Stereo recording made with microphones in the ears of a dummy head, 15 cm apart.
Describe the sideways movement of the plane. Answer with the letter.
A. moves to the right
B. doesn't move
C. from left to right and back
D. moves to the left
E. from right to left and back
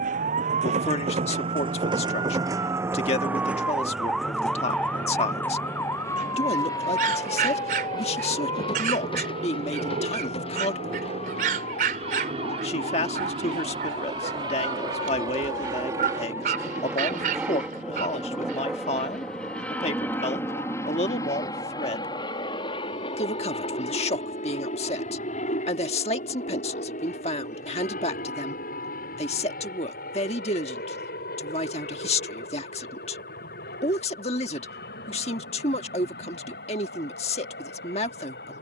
D.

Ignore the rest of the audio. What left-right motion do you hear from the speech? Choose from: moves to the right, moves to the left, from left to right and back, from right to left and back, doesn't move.
doesn't move.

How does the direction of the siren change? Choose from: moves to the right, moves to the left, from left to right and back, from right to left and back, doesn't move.
moves to the left.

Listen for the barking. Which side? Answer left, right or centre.
right.